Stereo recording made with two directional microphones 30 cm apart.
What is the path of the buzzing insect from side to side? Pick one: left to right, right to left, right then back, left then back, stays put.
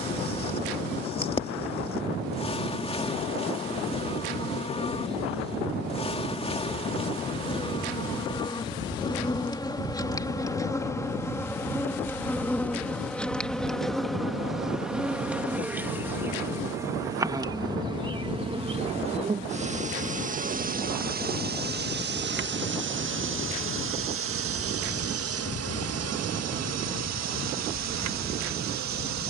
left to right.